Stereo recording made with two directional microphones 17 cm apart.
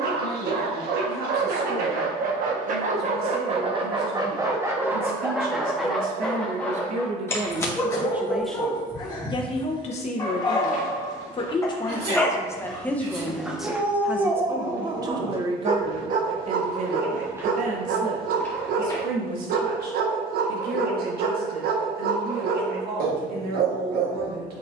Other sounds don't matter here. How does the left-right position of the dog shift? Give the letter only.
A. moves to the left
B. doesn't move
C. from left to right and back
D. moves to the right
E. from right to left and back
E.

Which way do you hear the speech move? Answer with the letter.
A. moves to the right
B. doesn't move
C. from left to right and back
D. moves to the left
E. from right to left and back
E.